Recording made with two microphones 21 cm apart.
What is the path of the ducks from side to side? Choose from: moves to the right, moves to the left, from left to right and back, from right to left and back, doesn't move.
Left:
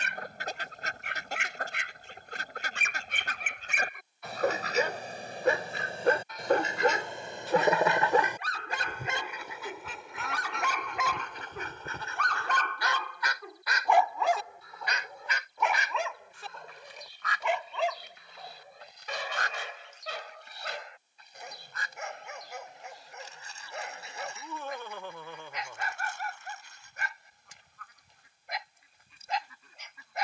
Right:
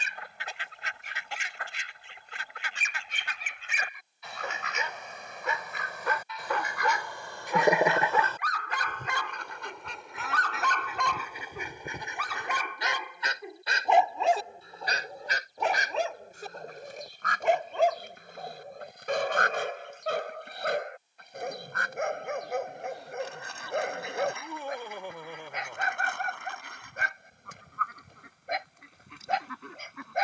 moves to the right.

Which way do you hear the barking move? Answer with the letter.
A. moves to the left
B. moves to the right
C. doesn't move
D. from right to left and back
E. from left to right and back
B.